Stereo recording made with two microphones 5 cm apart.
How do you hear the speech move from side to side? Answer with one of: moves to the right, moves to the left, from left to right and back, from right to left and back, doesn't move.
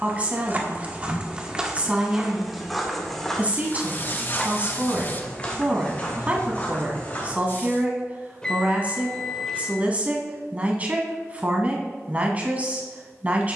doesn't move.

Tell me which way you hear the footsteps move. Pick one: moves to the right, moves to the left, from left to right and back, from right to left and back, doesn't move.
moves to the left.